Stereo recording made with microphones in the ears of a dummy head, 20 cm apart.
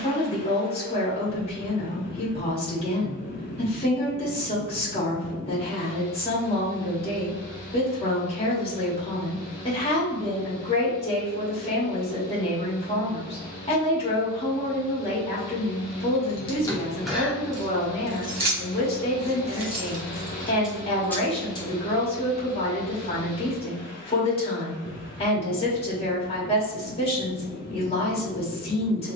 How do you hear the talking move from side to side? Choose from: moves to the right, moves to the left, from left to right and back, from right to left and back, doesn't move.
doesn't move.